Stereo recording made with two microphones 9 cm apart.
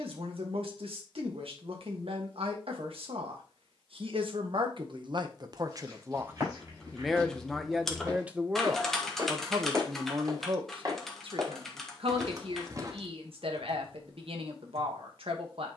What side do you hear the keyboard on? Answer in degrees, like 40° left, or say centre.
centre.